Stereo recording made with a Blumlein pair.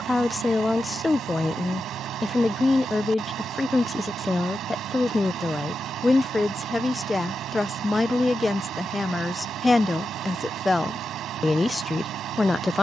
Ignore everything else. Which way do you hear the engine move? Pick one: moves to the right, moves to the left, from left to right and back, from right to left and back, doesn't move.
doesn't move.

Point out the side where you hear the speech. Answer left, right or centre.
centre.